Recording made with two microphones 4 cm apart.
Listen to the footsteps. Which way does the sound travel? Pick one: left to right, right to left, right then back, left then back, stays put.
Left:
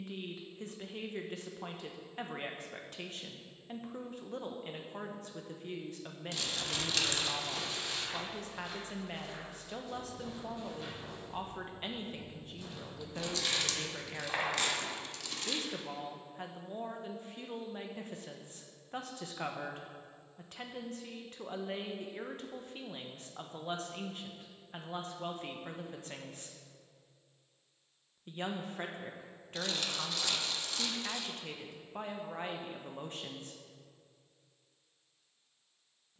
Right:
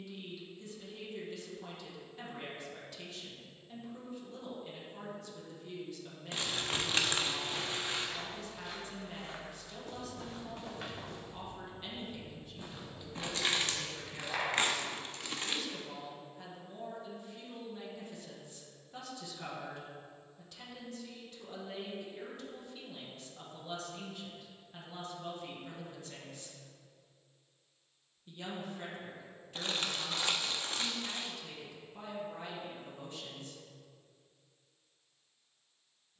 right then back.